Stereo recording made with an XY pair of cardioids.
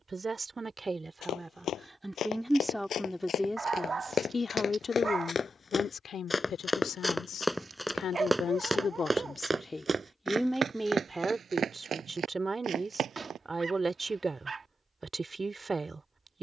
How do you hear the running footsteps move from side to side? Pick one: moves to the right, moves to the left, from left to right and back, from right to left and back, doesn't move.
moves to the right.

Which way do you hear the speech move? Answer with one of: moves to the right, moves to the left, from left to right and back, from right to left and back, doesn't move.
from right to left and back.